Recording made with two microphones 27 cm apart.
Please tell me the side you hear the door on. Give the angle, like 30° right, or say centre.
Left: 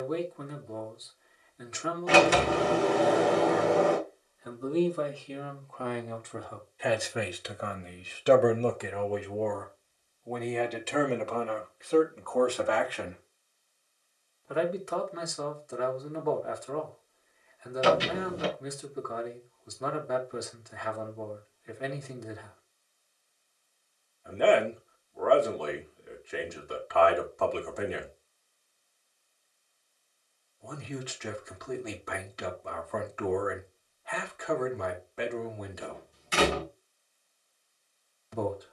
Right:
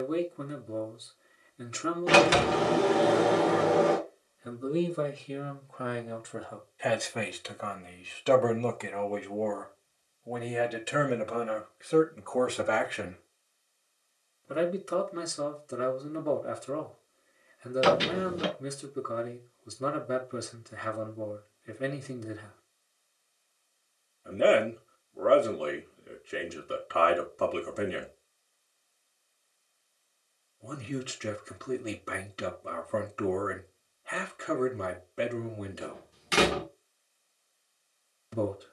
80° right.